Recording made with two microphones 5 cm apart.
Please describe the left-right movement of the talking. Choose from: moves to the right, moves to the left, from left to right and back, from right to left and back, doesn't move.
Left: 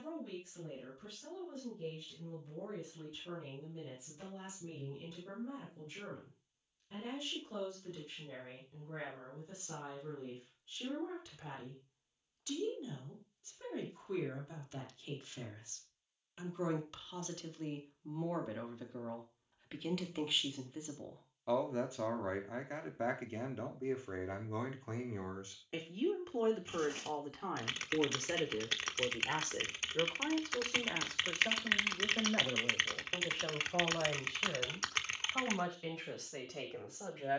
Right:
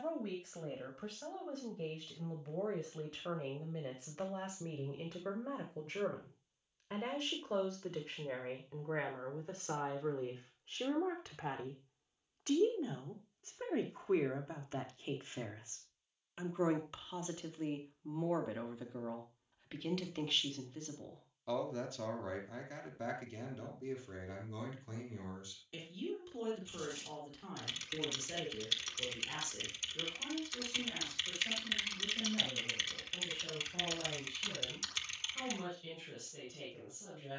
moves to the left.